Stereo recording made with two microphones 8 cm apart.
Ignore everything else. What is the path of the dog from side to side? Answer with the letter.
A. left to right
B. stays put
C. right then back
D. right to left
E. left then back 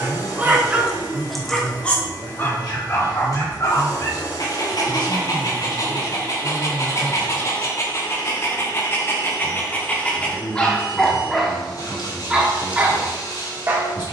E.